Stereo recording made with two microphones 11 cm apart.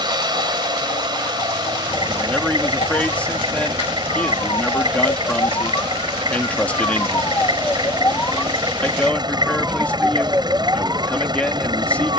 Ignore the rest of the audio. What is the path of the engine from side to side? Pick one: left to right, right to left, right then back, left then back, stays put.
stays put.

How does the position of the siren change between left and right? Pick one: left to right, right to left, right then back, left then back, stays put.
left to right.